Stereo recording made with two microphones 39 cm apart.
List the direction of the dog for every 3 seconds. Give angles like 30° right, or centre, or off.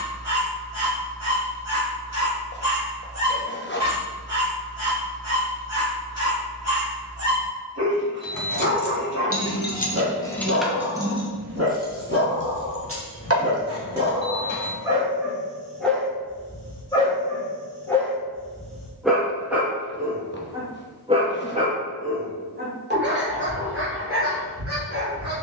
40° right, 40° right, 40° right, 40° right, 20° right, 10° left, centre, 20° right, 40° right.